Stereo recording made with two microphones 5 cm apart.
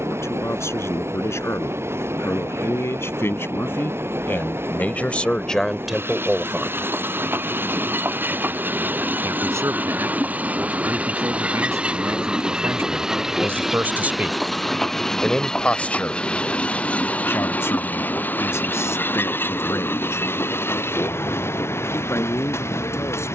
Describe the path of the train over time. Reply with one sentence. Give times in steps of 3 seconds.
You can hear the train on the right from 0 s, in the centre from 12 s and on the left from 15 s.